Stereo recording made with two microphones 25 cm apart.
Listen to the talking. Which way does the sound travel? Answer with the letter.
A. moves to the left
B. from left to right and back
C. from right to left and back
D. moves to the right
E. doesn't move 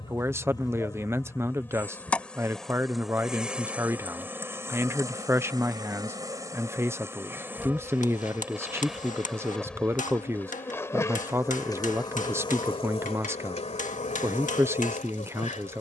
E.